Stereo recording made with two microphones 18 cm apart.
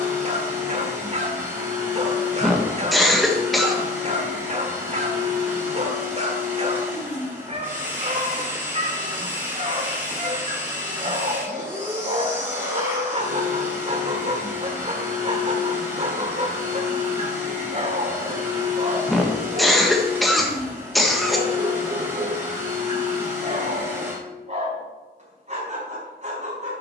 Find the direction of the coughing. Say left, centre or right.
centre.